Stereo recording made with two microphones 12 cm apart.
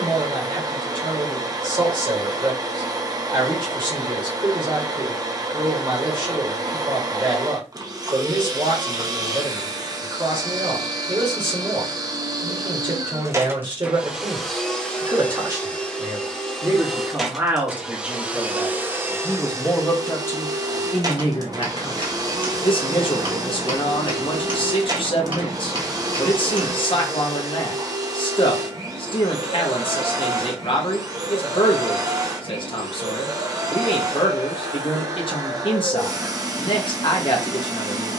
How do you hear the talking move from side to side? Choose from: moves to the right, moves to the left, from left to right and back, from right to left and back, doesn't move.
moves to the left.